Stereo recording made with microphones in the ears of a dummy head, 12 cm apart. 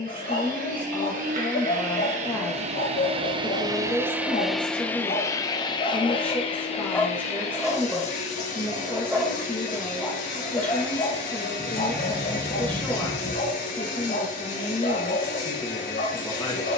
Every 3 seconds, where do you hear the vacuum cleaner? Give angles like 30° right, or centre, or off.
60° right, centre, 50° left, 70° left, 70° left, 70° left.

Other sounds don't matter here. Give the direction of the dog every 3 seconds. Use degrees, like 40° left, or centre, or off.
80° left, 60° left, centre, 20° left, 70° left, 70° left.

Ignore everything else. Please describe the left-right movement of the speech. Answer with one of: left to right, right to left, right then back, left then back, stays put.
stays put.